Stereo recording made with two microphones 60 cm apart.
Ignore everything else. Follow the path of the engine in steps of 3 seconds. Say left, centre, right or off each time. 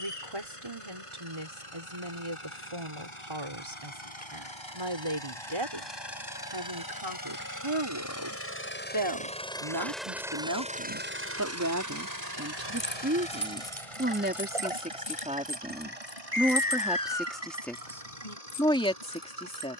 left, left, left, centre, right, right, right.